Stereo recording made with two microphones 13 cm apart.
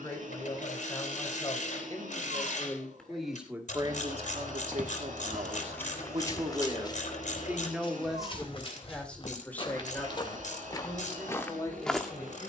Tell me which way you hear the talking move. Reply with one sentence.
You can hear the talking move from left to right and back again.